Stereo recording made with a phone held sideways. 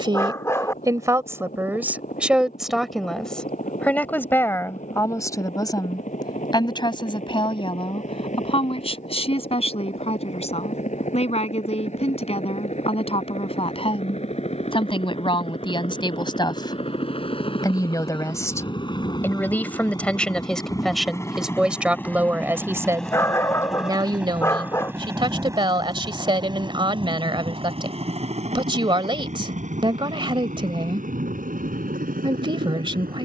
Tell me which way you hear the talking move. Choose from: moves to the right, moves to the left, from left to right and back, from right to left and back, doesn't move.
from right to left and back.